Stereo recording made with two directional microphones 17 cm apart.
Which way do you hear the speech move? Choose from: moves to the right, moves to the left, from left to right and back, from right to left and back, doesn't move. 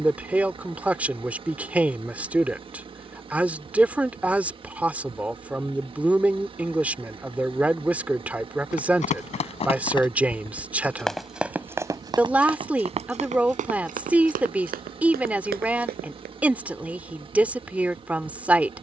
doesn't move.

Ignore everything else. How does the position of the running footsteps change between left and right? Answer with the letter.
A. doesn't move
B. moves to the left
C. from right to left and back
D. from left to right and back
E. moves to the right
E.